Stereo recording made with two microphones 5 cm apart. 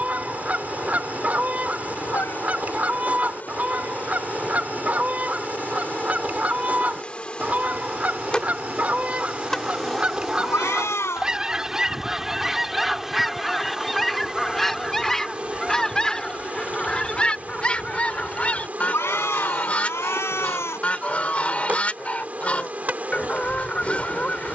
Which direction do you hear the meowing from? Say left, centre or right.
left.